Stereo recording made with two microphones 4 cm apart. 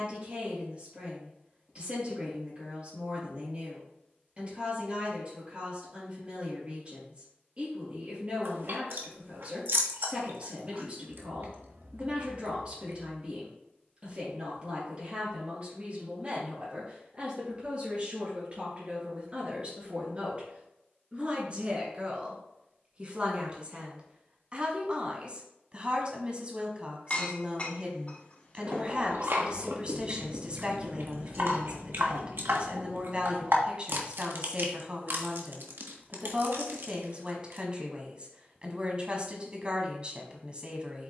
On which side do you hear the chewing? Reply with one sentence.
You can hear the chewing on the right.